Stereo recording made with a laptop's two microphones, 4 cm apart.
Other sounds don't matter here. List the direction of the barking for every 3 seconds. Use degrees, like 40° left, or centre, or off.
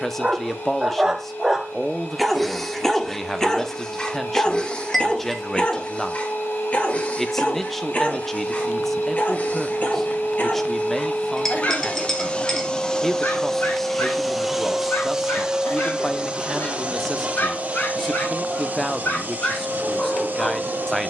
10° right, 20° left, 40° left, 40° left, 50° left, 50° left, 50° left.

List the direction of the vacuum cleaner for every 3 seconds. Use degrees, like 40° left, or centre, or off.
80° left, 70° left, 60° left, 50° left, 10° left, 30° right, 50° right.